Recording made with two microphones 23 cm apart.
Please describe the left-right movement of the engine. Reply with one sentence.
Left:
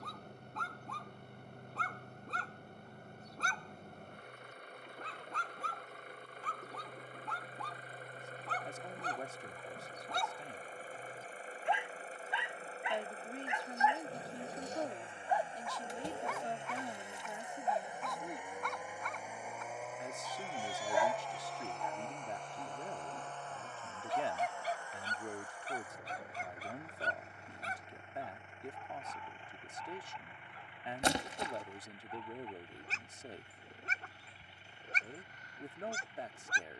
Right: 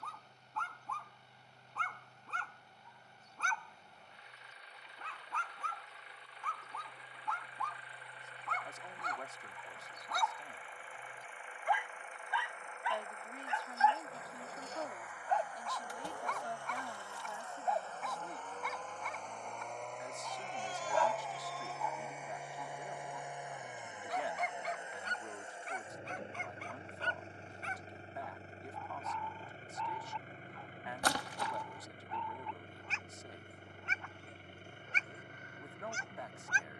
In this clip you hear the engine go from the left side to the right.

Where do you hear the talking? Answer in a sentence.
In this clip you hear the talking on the left.